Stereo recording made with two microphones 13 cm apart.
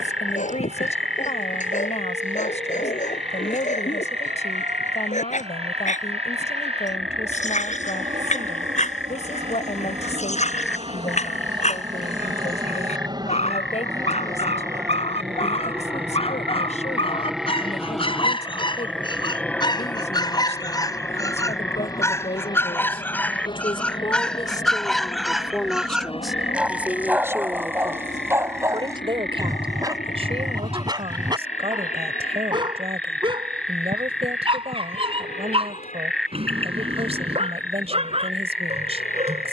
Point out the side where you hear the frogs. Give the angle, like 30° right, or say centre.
centre.